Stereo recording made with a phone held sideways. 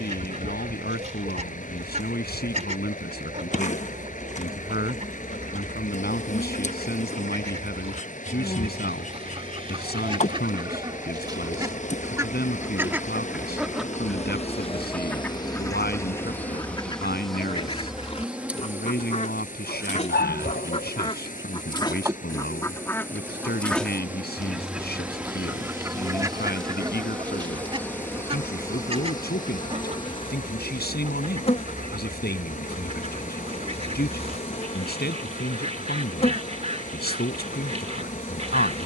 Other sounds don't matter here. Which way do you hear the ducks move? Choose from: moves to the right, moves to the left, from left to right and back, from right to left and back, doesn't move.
from right to left and back.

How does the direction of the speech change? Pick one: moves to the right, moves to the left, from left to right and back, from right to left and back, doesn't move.
doesn't move.